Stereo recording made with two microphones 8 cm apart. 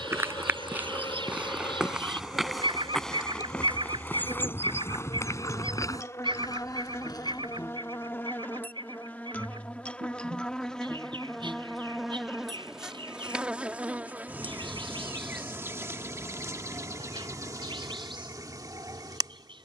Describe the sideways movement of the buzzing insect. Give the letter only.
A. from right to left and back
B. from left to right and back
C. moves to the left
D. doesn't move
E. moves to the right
E.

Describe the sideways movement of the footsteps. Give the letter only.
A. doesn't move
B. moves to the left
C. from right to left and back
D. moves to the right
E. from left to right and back
B.